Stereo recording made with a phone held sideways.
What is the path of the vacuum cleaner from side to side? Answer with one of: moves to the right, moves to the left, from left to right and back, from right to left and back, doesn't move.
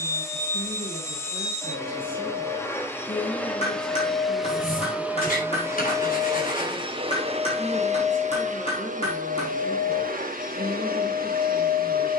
moves to the right.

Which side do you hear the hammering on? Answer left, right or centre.
left.